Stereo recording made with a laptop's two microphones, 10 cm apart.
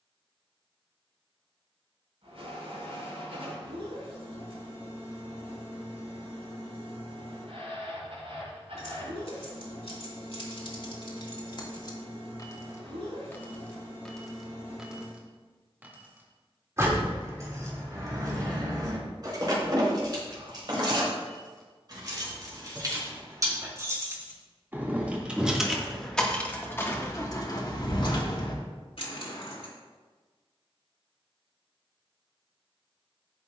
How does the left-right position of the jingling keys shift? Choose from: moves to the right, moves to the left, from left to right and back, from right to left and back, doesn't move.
from left to right and back.